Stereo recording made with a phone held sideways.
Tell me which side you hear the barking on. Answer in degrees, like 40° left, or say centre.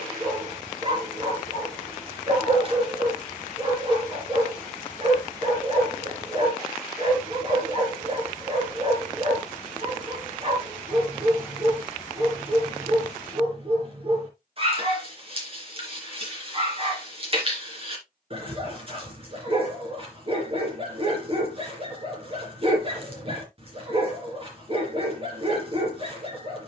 40° right.